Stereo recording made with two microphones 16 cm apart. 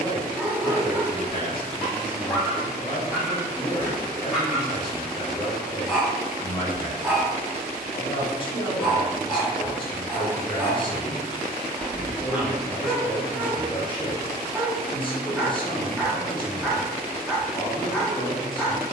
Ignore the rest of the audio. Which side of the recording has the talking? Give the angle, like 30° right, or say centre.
30° left.